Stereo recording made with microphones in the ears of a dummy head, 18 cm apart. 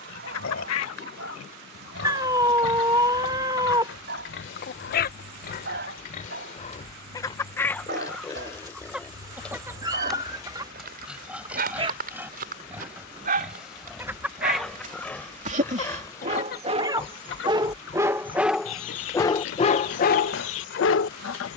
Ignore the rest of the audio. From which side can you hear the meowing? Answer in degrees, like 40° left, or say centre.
20° right.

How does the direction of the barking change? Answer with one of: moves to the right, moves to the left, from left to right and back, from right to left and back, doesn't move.
moves to the left.